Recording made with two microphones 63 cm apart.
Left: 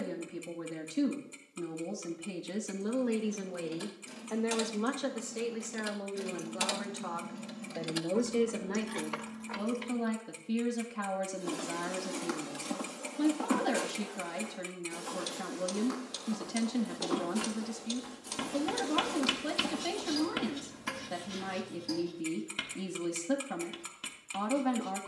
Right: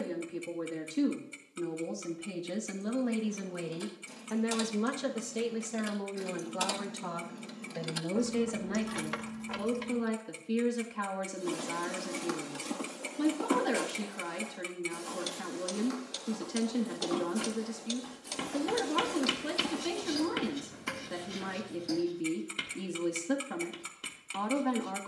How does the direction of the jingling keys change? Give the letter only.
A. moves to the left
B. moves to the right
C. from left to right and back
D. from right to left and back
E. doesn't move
B.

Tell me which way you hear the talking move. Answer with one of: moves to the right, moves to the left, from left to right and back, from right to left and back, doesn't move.
from left to right and back.